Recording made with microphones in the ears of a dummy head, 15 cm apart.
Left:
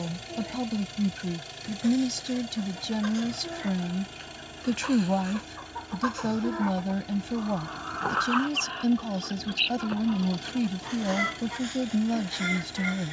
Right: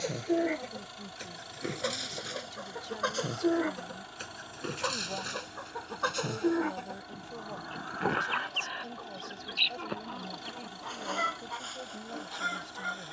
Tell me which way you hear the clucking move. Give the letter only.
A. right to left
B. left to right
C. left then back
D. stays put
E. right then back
A.